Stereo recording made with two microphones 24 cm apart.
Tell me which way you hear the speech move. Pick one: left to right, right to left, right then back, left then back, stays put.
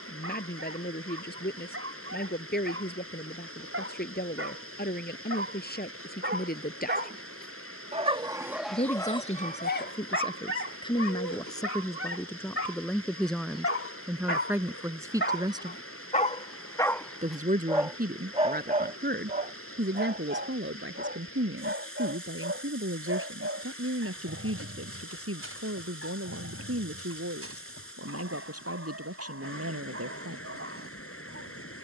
left to right.